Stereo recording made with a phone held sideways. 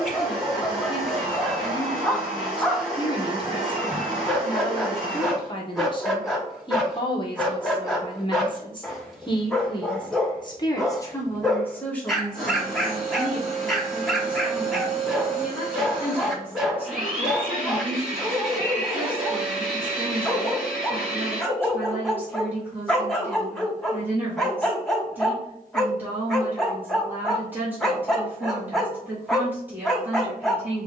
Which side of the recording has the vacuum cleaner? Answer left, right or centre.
centre.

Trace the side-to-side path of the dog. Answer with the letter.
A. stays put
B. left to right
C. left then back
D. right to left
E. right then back
A.